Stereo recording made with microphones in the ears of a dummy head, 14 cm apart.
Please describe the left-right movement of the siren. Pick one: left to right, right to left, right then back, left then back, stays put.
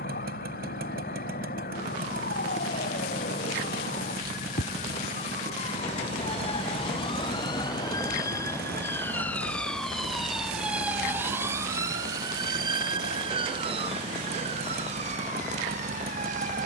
left to right.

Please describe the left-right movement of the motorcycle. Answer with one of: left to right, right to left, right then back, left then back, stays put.
stays put.